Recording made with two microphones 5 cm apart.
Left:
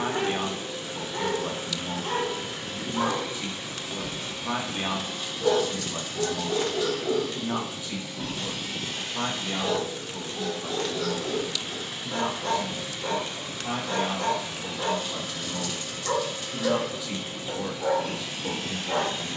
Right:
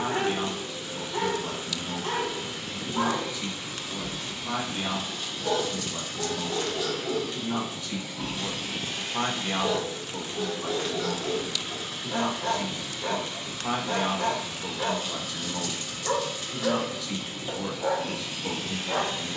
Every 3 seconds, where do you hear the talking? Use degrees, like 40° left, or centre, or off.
20° left, 20° left, 10° left, 50° right, 50° right, centre, 10° left.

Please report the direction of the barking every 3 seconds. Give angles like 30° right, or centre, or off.
10° right, 10° left, 10° left, 10° right, 10° right, 10° right, 10° right.